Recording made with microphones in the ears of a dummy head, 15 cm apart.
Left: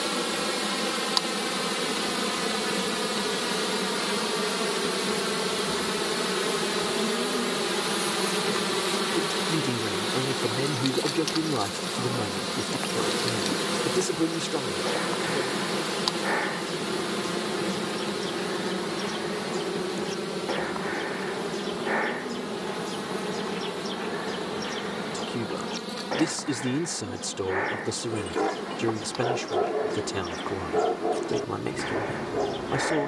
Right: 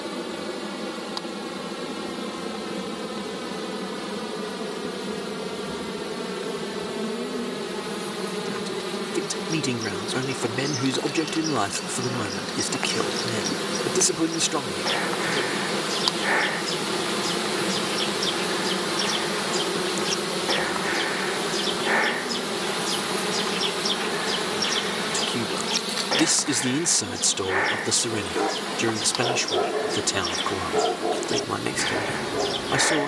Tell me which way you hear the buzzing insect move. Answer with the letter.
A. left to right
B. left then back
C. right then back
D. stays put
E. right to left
A.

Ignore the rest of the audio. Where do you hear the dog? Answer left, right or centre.
centre.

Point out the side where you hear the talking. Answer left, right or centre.
right.